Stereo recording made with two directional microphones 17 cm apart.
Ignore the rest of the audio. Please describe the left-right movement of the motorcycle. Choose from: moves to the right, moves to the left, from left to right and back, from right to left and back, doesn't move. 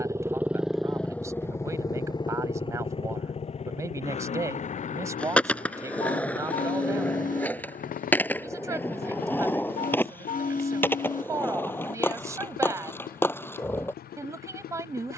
moves to the left.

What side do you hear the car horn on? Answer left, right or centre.
left.